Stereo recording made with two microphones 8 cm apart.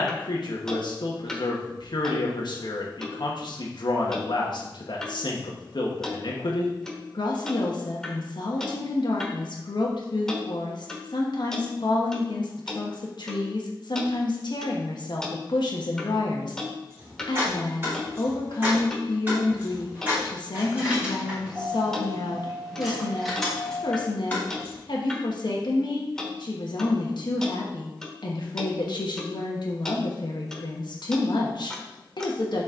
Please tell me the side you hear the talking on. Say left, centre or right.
left.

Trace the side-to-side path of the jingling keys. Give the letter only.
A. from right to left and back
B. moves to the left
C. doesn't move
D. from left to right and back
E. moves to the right
B.